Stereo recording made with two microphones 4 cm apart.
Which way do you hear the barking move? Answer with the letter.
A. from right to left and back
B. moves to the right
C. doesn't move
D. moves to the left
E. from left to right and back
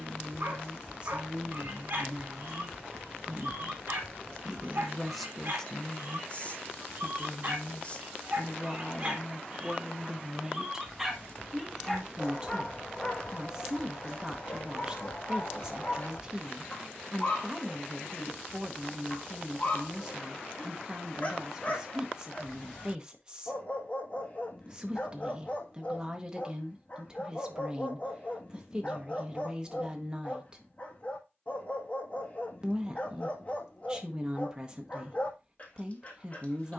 D.